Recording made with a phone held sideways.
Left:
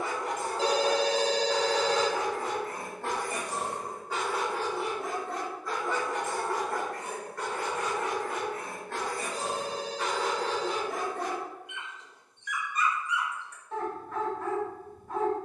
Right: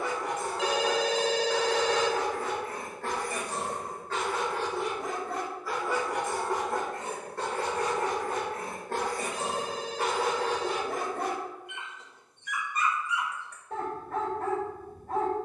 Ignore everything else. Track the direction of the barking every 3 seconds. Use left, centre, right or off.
left, centre, right, right, right.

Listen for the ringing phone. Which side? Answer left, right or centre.
left.